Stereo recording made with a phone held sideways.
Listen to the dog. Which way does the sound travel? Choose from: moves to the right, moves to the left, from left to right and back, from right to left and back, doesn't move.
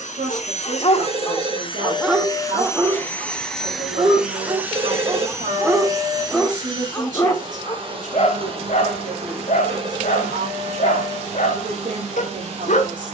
from left to right and back.